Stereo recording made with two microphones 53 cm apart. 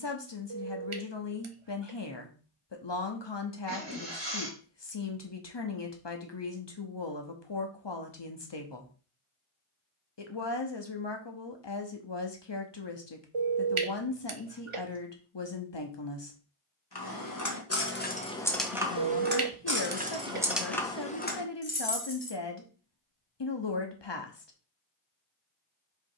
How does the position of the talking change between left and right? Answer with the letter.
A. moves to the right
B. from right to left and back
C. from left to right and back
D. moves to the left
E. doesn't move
E.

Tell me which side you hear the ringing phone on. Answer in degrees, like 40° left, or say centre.
70° right.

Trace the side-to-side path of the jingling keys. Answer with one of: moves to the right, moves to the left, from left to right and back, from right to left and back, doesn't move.
from left to right and back.